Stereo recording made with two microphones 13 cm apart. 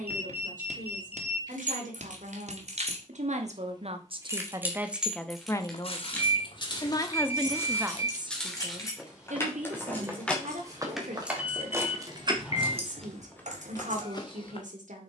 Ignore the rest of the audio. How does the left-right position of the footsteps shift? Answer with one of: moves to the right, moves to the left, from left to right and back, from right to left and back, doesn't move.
from left to right and back.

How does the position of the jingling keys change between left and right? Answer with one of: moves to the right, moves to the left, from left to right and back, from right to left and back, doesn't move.
from right to left and back.